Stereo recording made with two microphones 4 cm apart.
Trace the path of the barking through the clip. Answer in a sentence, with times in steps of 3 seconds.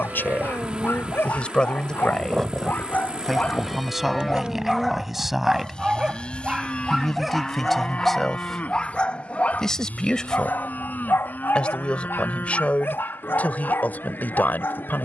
In this clip you hear the barking on the left from 0 s, in the centre from 3 s and on the left from 9 s.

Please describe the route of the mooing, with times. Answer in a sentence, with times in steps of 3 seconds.
You can hear the mooing on the right from 0 s, in the centre from 3 s and on the left from 6 s.